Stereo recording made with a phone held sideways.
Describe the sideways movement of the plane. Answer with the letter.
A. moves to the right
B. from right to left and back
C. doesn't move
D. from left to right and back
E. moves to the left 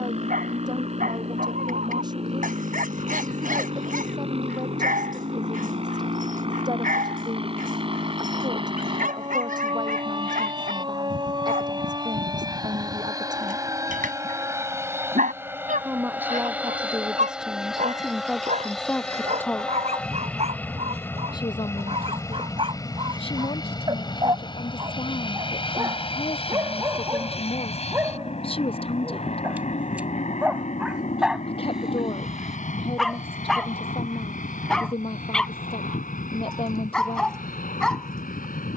E.